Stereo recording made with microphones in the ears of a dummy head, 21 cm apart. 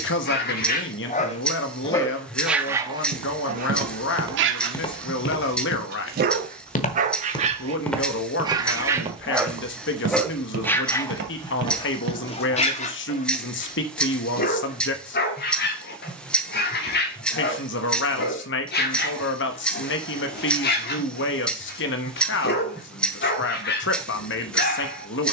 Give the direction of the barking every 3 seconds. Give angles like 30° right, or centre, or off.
20° left, 40° right, 30° right, 10° left, 30° left, 40° left, 40° left, 40° left, 40° left.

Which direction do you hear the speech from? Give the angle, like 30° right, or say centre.
50° left.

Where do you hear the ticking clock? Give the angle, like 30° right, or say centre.
centre.